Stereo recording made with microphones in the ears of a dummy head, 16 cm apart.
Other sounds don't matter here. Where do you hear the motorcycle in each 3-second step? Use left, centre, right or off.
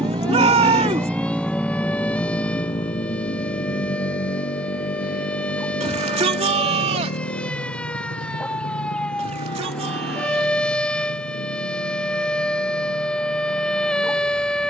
centre, left, left, left, left.